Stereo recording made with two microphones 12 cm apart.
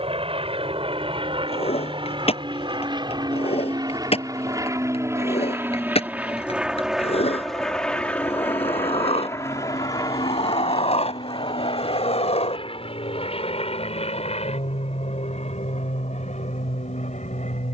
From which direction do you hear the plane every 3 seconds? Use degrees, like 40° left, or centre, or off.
50° right, 30° right, centre, 30° left, 50° left, 60° left.